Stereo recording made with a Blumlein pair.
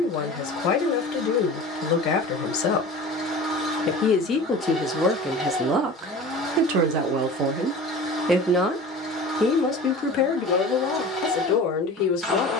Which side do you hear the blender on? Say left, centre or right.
centre.